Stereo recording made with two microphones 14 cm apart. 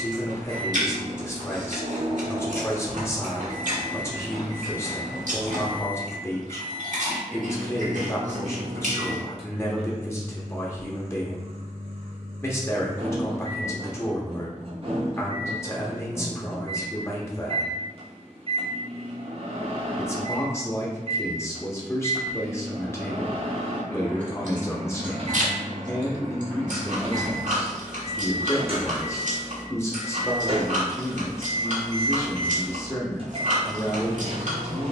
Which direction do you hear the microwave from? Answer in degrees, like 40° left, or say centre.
50° right.